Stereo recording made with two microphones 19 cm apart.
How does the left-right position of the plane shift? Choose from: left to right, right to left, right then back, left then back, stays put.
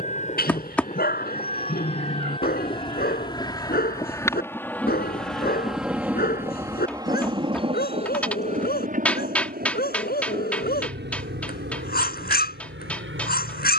left to right.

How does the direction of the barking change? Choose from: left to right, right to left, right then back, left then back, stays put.
stays put.